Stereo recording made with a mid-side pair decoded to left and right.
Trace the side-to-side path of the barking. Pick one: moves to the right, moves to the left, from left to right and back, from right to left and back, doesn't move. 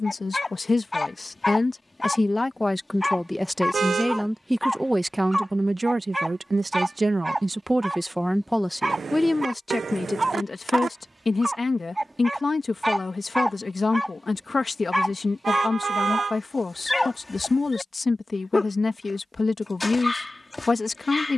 from left to right and back.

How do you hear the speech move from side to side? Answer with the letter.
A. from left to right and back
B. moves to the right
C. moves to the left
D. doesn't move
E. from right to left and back
A.